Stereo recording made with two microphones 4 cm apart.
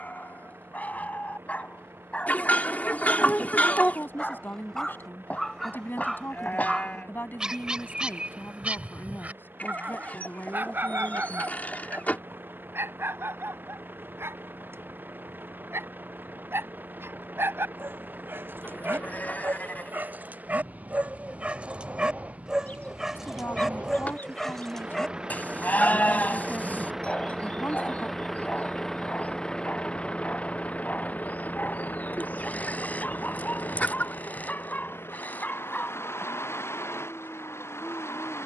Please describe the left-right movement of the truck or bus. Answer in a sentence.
In this clip you hear the truck or bus go from the right side to the left.